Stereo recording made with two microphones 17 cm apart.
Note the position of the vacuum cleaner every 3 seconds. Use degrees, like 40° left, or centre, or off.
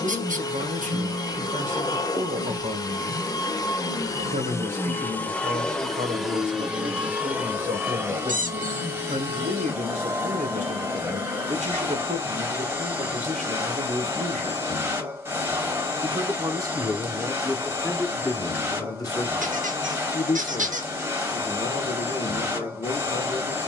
20° left, 20° left, 10° right, 20° right, 20° right, 20° right, 20° right, 20° right.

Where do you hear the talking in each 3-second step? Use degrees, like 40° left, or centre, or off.
50° right, 50° right, 50° right, 50° right, 50° right, 10° right, 30° left, 40° left.